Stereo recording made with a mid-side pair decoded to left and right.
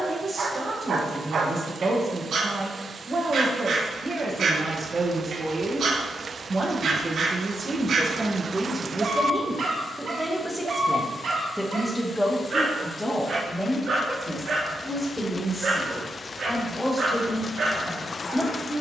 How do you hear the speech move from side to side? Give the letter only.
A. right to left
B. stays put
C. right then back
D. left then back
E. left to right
A.